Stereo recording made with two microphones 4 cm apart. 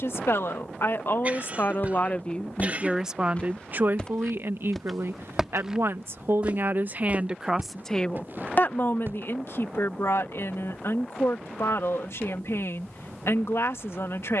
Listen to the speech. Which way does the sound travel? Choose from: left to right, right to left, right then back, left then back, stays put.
right then back.